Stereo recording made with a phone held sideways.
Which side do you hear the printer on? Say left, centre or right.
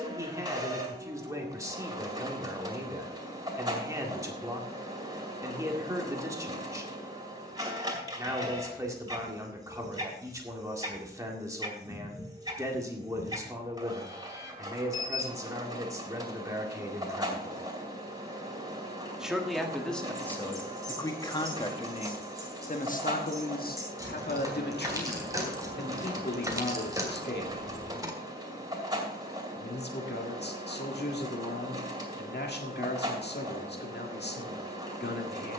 right.